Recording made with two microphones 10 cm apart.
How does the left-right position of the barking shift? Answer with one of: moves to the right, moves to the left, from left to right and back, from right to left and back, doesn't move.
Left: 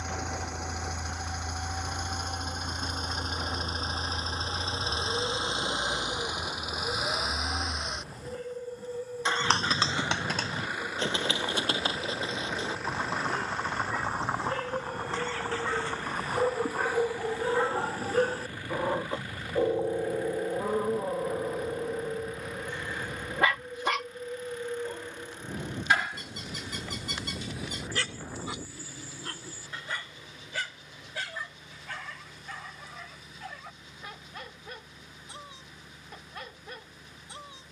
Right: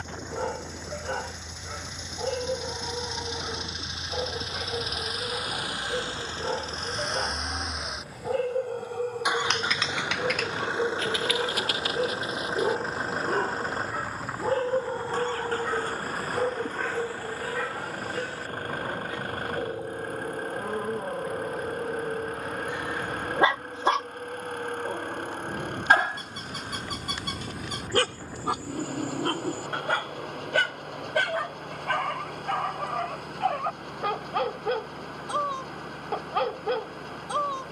from right to left and back.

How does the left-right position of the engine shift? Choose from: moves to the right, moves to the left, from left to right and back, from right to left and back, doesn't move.
moves to the right.